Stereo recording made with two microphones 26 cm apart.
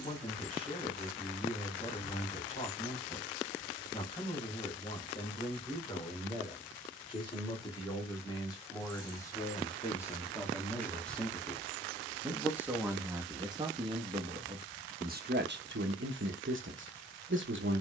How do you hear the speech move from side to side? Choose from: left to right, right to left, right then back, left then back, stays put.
left to right.